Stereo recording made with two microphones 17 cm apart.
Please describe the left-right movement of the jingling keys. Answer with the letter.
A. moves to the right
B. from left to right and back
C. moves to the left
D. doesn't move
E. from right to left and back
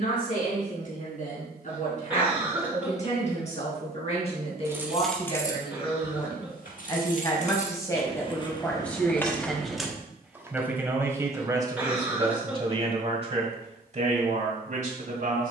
E.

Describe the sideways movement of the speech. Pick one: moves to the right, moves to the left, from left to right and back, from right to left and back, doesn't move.
moves to the right.